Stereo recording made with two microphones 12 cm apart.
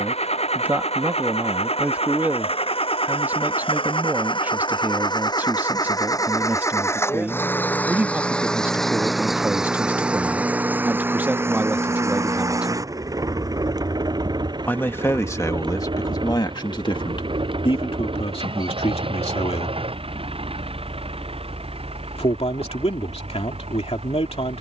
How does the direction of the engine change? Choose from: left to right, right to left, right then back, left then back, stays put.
left to right.